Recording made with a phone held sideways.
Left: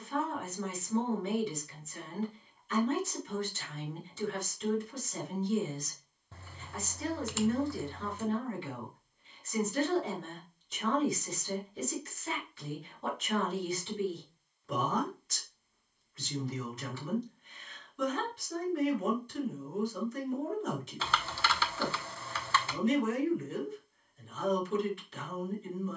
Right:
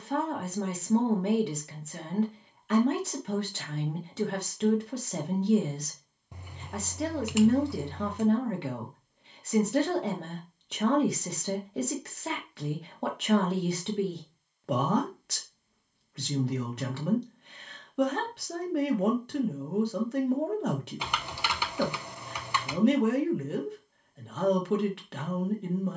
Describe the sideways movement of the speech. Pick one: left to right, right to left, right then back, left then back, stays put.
stays put.